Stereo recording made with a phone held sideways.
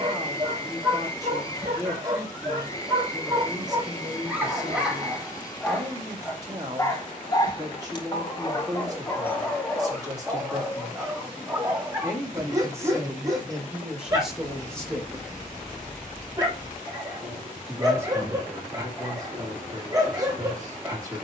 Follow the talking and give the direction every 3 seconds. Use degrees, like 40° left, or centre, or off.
20° right, 20° right, 20° right, 20° right, 10° right, 10° right, 20° right.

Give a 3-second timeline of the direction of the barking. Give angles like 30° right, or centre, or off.
30° right, 10° right, 20° left, centre, 20° right, 20° right, 20° right.